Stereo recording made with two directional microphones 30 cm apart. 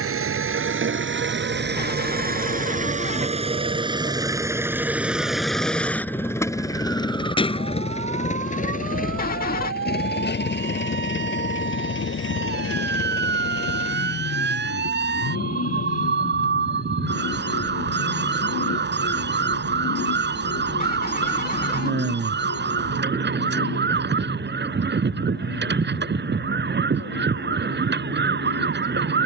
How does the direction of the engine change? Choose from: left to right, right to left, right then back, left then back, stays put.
right to left.